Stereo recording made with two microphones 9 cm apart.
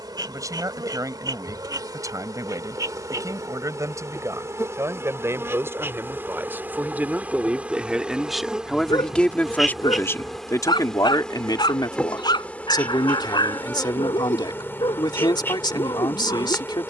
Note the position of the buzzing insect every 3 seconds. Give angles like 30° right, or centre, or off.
50° right, 30° right, 20° right, centre, 20° left, 30° left.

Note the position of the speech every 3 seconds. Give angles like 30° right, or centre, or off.
40° right, 30° right, 10° right, 40° left, 60° left, 60° left.